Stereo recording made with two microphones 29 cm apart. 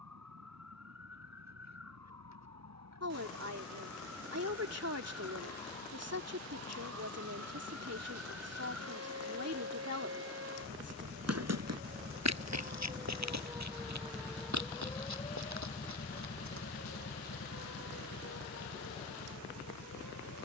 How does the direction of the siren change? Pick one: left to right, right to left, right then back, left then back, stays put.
right to left.